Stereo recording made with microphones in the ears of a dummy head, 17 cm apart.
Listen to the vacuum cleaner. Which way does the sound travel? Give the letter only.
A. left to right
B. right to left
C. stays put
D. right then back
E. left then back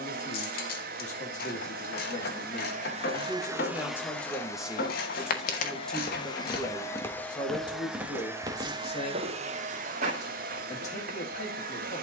E.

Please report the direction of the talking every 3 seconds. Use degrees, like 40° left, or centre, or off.
40° left, 10° left, 20° left, 40° left.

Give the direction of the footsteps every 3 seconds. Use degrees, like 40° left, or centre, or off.
off, 50° left, centre, 40° right.